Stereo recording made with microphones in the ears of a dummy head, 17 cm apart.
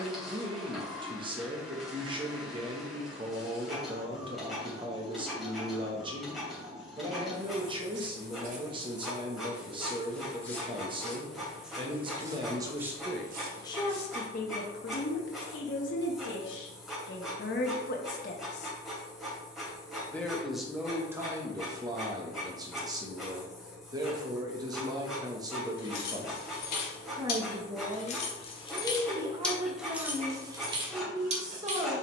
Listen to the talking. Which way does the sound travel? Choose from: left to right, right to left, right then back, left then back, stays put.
left then back.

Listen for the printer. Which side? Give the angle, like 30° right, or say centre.
centre.